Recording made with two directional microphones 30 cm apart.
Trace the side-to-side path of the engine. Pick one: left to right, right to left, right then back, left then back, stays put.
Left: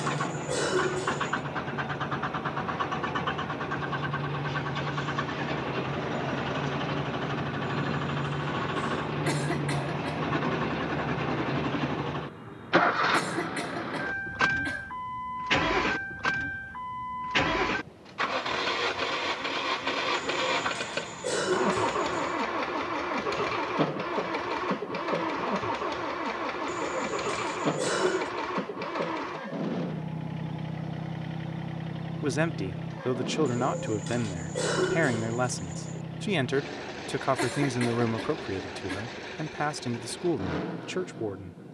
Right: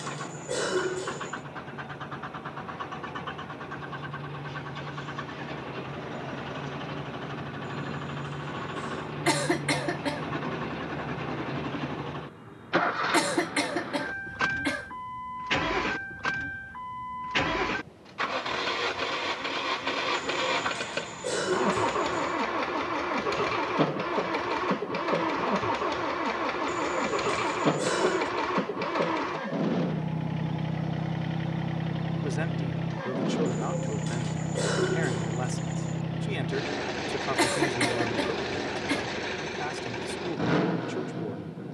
left to right.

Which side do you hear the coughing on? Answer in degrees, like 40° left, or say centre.
40° right.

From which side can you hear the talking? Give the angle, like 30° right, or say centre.
40° left.